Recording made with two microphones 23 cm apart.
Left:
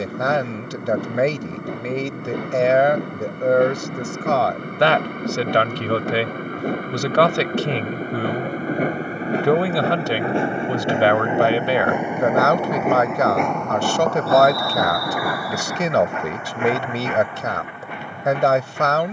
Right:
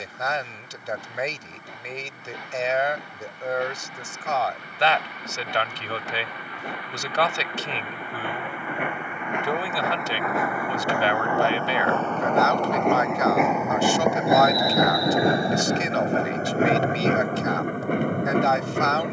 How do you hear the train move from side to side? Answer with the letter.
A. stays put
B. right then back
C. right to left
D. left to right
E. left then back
D.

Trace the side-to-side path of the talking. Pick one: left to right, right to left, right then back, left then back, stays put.
stays put.